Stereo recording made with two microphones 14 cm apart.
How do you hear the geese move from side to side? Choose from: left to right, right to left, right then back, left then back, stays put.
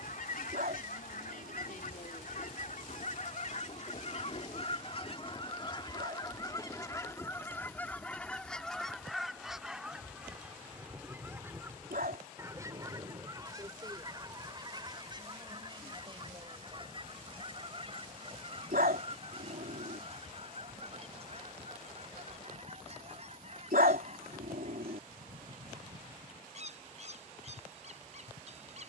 left to right.